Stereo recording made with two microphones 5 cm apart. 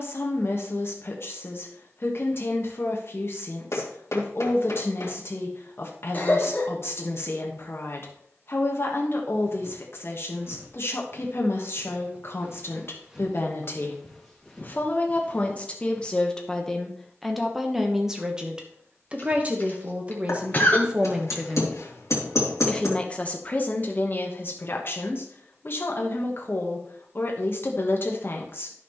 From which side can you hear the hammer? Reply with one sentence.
You can hear the hammer on the left.